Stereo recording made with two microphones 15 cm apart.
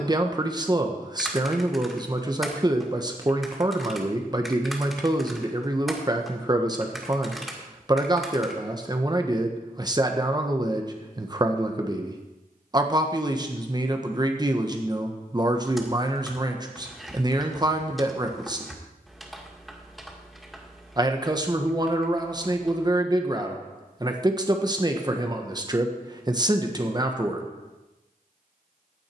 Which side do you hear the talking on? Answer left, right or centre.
right.